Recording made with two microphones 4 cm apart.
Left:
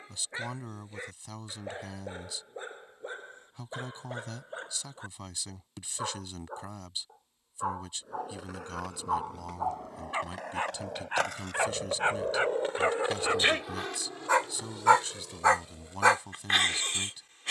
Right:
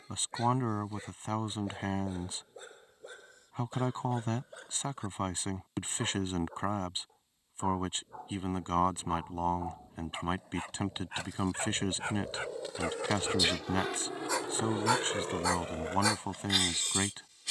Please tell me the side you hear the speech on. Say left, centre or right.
right.